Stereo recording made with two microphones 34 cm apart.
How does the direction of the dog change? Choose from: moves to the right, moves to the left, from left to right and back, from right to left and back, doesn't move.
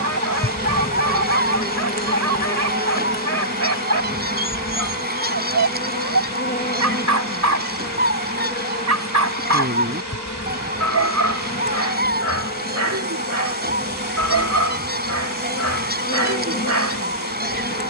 doesn't move.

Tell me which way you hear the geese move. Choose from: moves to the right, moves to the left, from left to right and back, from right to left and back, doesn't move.
doesn't move.